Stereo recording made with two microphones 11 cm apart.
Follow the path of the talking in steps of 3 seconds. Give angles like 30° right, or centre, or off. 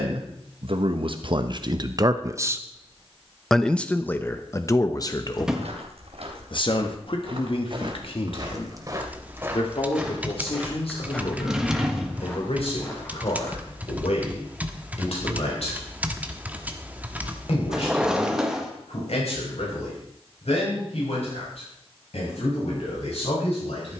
40° right, 30° left, 60° left, 70° left, 70° left, 70° left, 70° left, 70° left.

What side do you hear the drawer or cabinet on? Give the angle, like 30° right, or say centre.
10° right.